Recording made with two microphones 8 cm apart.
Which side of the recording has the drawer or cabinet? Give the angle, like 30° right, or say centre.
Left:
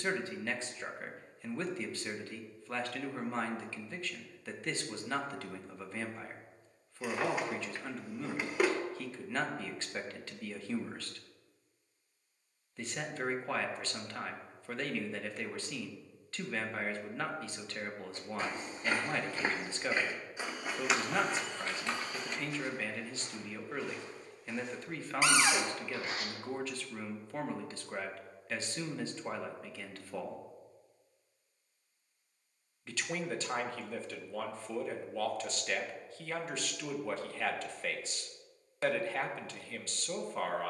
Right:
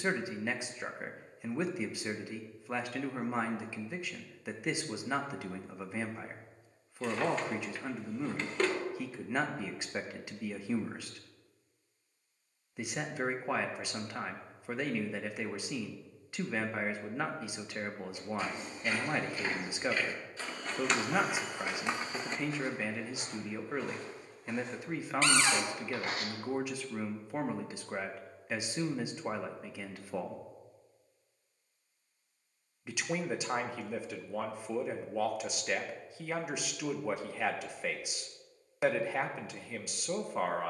10° left.